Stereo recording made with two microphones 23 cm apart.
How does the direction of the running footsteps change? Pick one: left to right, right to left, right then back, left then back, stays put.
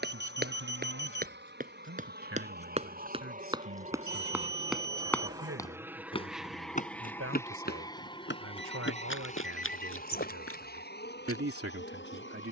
right to left.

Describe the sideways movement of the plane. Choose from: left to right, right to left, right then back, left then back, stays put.
right to left.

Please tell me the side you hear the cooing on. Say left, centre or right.
left.